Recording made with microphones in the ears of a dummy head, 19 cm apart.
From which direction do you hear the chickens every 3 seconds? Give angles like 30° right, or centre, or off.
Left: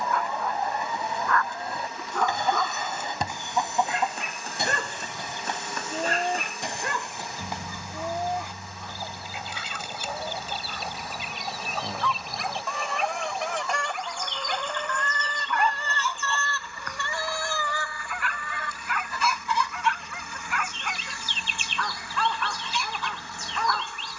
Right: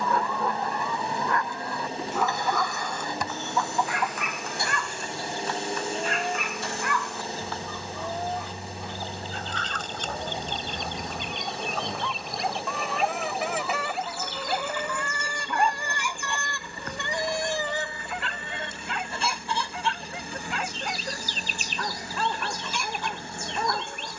20° left, 20° left, 10° left, 10° left, centre, 10° right, 30° right, 40° right.